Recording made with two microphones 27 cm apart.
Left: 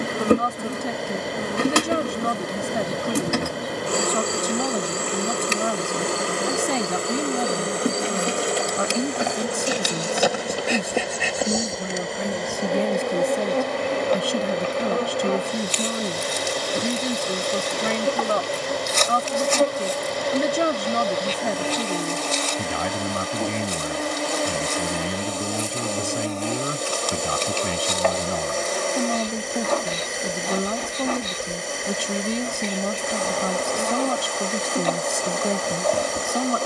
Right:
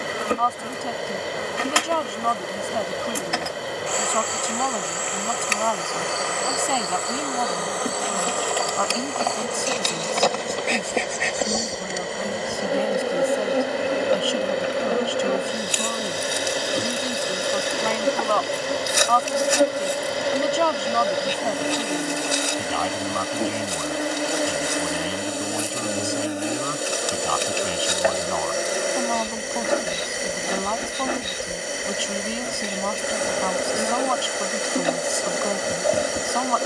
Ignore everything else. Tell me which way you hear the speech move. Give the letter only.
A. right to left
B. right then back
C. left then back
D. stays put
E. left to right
D.